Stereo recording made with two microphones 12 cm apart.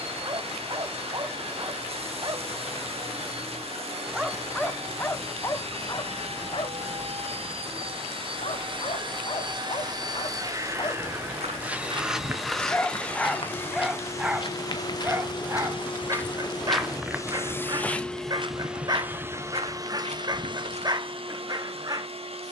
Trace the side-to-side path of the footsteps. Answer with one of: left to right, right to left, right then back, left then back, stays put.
left then back.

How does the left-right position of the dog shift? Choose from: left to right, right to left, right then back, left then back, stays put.
left then back.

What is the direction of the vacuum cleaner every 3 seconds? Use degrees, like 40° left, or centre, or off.
60° right, 60° right, 60° right, 30° right, 20° left, 30° left, 20° right, 60° right.